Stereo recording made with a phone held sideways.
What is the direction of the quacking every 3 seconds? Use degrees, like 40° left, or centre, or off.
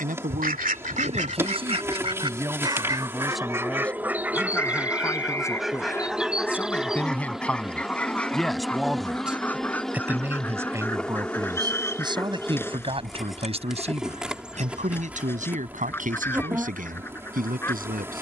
50° right, 10° right, 10° left, 10° left, 10° left, 10° left.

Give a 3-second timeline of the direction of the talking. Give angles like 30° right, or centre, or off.
40° right, 10° left, 10° left, 20° right, 40° right, 60° right.